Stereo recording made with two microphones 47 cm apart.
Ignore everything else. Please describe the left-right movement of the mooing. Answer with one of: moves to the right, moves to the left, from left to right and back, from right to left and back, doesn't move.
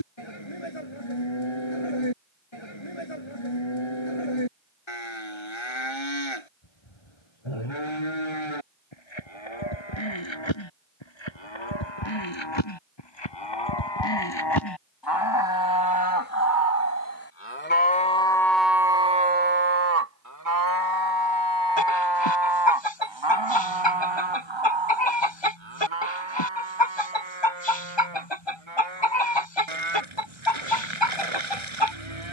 moves to the right.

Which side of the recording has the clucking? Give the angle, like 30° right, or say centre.
70° left.